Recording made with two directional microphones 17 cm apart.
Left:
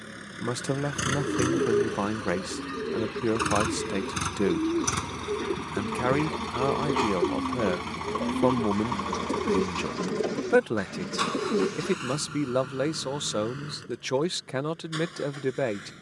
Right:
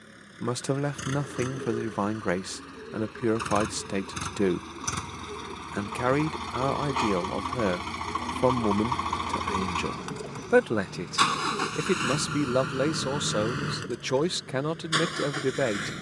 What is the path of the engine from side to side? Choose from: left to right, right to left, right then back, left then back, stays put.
left to right.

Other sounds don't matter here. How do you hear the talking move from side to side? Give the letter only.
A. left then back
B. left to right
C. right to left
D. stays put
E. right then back
D.